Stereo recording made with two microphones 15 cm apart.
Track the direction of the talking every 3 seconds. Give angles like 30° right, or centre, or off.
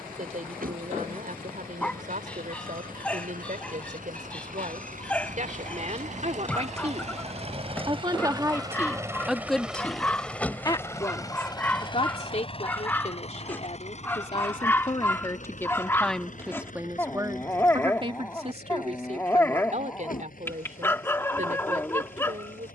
70° right, 60° right, 40° right, 20° left, 40° left, centre, 50° right, 60° right.